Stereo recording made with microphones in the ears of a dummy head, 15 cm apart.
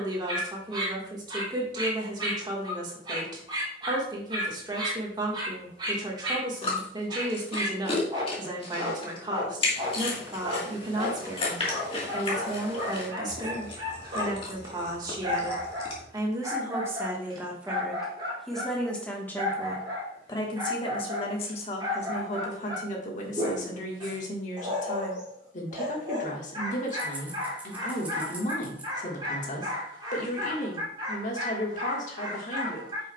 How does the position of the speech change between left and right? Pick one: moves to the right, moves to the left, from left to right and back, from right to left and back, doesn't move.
moves to the left.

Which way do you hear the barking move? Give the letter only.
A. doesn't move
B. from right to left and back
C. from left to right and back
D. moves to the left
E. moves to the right
A.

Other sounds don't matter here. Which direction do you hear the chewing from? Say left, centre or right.
left.